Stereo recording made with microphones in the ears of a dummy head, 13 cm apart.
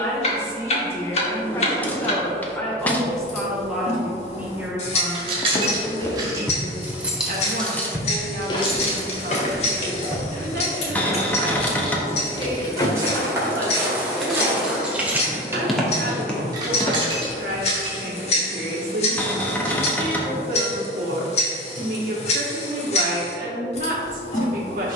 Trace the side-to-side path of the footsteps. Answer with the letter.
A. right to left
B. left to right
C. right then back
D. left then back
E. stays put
C.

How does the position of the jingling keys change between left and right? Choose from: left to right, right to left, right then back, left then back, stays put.
left then back.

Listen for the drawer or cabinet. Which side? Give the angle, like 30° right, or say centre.
10° left.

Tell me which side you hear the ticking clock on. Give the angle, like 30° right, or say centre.
50° left.